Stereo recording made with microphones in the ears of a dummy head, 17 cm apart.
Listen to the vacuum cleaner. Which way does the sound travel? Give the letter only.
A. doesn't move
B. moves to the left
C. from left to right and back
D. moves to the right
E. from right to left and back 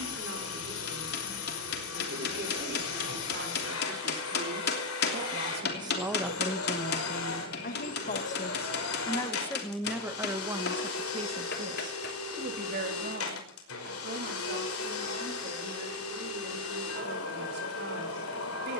A.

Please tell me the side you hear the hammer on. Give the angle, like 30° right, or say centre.
60° left.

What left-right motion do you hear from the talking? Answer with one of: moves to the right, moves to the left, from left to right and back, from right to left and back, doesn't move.
from right to left and back.